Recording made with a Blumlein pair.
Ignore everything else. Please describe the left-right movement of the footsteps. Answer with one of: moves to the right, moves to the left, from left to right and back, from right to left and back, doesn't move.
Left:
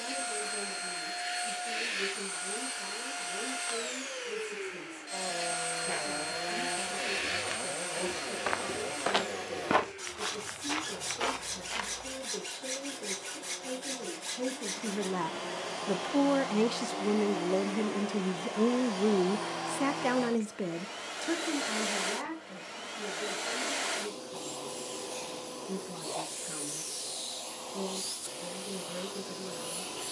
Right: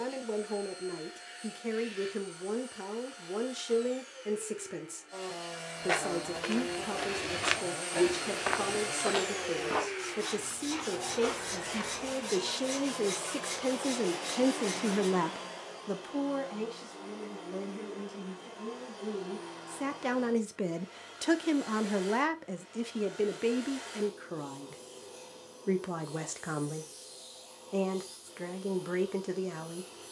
moves to the left.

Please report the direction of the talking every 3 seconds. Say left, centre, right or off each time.
right, right, right, right, right, left, left, right, right, right.